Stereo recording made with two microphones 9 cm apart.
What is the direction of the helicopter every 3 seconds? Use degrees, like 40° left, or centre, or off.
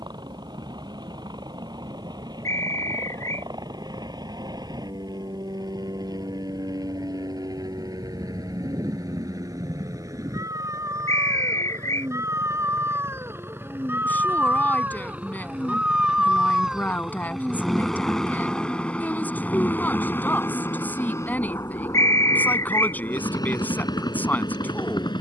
60° right, 50° right, 50° right, 40° right, 30° right, 10° right, 20° left, 40° left, 50° left.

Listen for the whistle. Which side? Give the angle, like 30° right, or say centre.
40° left.